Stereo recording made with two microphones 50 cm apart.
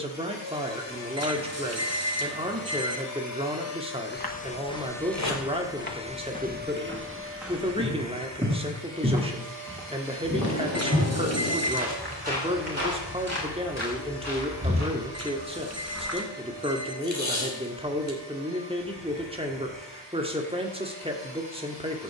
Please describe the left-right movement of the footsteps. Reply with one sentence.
You can hear the footsteps travel towards the right.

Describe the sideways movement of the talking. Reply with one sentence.
You can hear the talking stay put.